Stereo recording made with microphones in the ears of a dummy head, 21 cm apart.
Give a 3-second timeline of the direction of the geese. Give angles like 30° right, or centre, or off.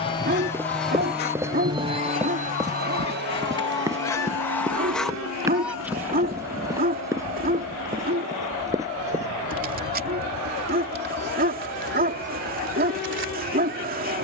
40° left, 10° left, 20° right, 40° right, 50° right.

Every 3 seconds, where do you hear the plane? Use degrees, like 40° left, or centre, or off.
10° right, 50° right, 70° right, 70° right, 70° right.